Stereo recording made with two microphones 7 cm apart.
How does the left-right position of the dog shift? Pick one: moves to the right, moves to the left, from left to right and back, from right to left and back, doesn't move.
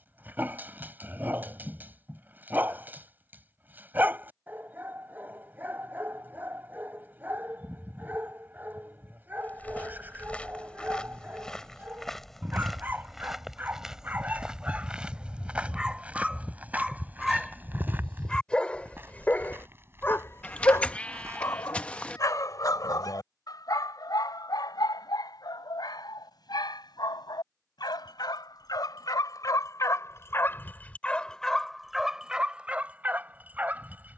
from right to left and back.